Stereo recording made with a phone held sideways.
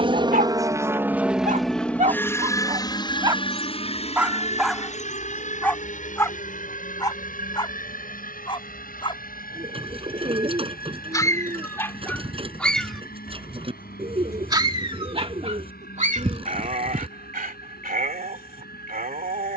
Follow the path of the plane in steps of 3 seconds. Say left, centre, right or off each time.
centre, left, left, left, left, left, left.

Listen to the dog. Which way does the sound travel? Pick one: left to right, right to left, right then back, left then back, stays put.
left then back.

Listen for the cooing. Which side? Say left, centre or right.
right.